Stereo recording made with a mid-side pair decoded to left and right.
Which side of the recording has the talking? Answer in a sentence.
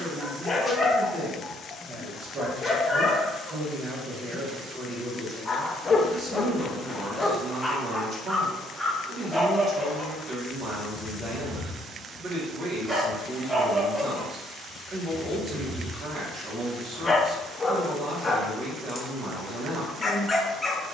You can hear the talking on the right.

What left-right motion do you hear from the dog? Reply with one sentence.
You can hear the dog go right and come back.